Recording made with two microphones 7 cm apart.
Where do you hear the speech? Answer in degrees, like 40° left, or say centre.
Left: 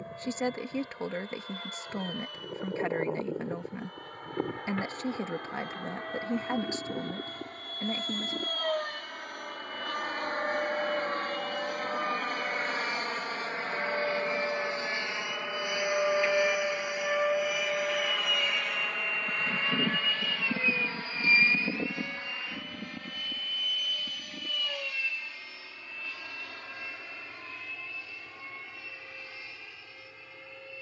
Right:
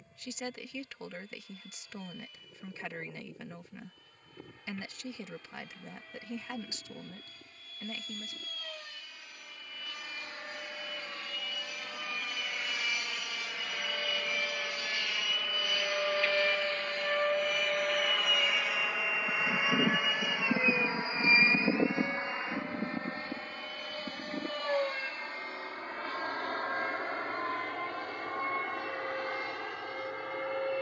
40° left.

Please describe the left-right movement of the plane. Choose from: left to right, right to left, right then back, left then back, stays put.
left to right.